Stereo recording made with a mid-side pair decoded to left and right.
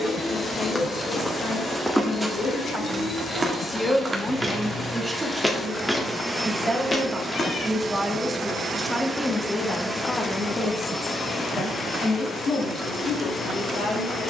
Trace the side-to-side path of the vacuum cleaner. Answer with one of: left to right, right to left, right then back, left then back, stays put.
right then back.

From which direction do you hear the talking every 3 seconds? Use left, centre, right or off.
left, centre, centre, left, left.